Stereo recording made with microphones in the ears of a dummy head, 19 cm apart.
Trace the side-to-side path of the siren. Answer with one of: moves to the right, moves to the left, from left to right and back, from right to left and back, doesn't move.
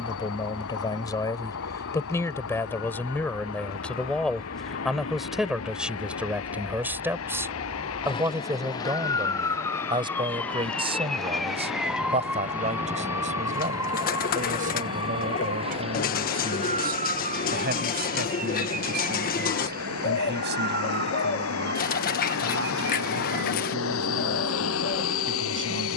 moves to the right.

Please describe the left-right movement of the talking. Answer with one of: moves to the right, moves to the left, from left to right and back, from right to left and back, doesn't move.
moves to the right.